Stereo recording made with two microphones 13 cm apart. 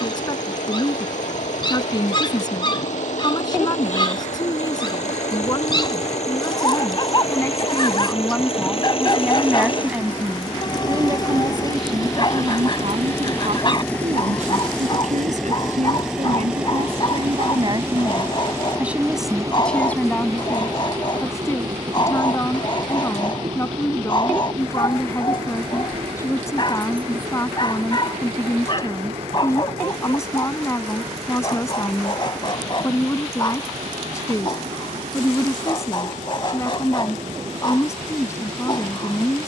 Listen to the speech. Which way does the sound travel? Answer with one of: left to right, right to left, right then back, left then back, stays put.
right then back.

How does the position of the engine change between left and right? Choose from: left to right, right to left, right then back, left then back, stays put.
left to right.